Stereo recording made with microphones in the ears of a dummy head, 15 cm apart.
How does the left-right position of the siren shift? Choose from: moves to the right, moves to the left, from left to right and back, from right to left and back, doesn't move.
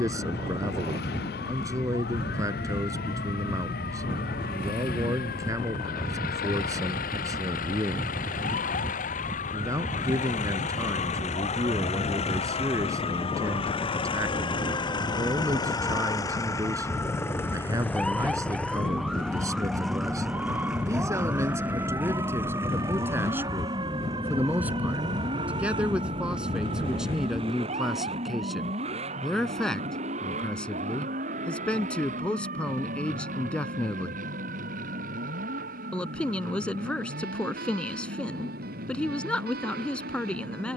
moves to the right.